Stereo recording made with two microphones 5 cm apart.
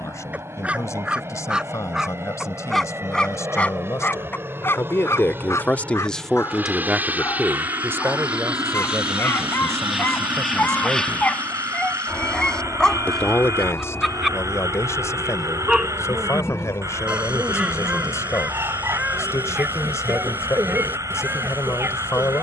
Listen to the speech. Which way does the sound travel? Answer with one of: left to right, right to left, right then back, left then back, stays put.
right then back.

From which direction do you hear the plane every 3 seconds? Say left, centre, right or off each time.
right, right, right, centre, left, left, left, left.